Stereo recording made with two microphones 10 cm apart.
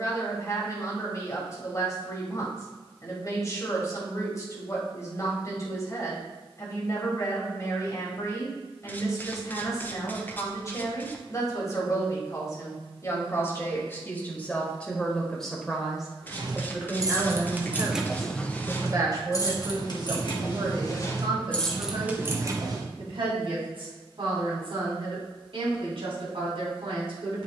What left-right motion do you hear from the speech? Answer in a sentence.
In this clip you hear the speech move from left to right.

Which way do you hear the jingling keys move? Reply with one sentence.
You can hear the jingling keys move from right to left and back again.